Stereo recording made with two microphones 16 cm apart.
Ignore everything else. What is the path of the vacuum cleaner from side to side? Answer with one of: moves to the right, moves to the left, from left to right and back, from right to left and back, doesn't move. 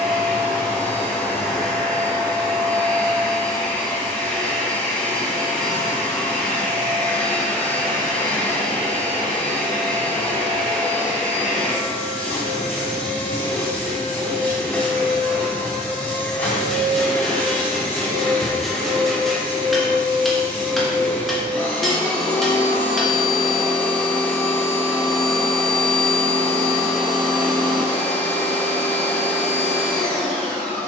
doesn't move.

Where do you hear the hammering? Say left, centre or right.
centre.